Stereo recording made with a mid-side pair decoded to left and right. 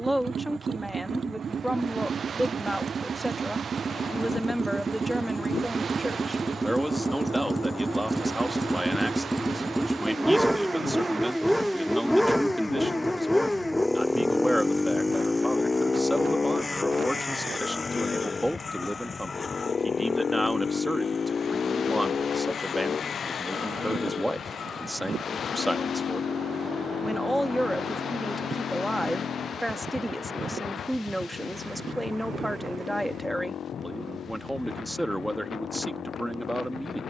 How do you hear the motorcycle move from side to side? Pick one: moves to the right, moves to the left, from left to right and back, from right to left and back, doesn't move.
moves to the left.